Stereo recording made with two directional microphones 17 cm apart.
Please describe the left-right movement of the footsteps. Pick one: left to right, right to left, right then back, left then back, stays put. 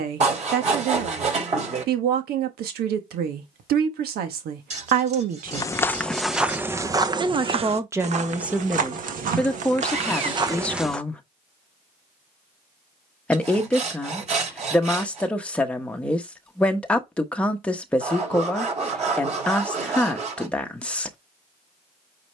right then back.